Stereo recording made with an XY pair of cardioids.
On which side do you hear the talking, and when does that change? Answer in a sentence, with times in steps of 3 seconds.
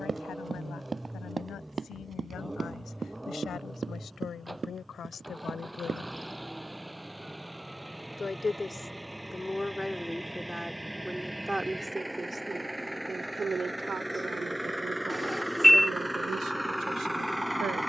In this clip you hear the talking on the left from 0 s, in the centre from 9 s and on the right from 12 s.